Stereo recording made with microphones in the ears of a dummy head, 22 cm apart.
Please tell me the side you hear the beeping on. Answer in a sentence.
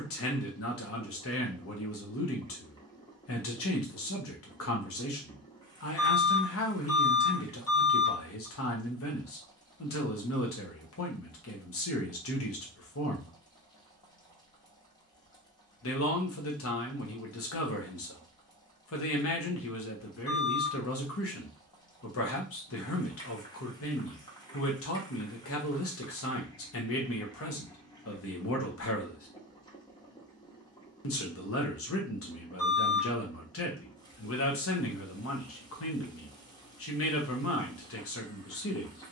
You can hear the beeping on the left.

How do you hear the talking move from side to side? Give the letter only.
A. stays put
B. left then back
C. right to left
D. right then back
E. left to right
A.